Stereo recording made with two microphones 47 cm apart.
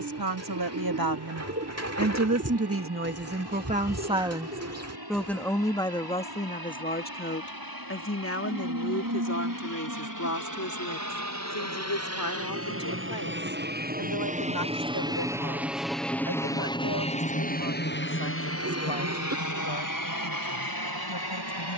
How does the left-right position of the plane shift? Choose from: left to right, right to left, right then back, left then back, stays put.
right to left.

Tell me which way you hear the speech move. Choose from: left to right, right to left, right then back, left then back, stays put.
right to left.